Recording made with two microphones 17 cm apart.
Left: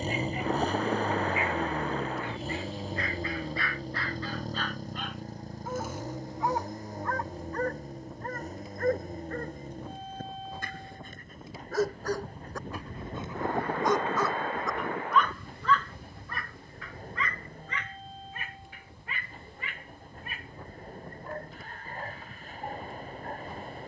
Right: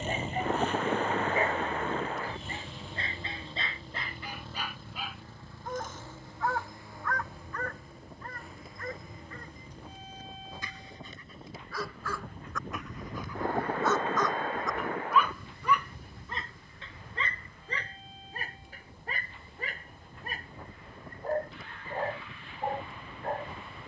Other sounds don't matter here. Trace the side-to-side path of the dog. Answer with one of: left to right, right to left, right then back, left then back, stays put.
left then back.